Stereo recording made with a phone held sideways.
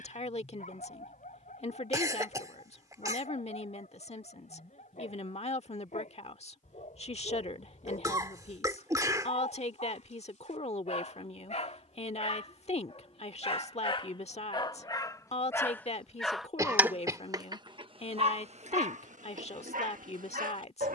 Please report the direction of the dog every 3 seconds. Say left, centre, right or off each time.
left, left, left, left, left, centre, right.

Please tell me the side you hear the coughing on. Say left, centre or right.
right.